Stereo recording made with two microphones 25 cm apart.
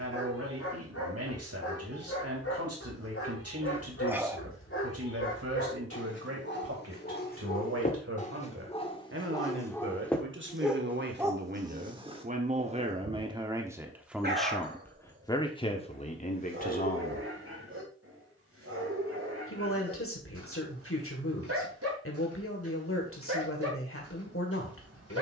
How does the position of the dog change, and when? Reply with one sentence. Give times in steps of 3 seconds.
In this clip you hear the dog on the left from 0 s, in the centre from 9 s and on the right from 12 s.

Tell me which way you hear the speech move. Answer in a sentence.
In this clip you hear the speech move from right to left.